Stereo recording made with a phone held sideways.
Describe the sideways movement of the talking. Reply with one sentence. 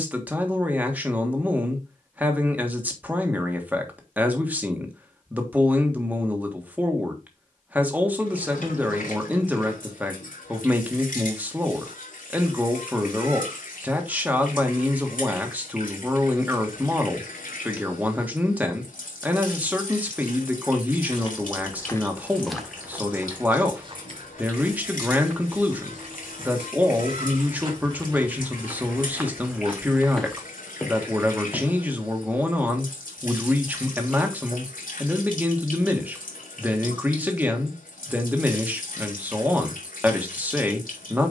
You can hear the talking stay in one place.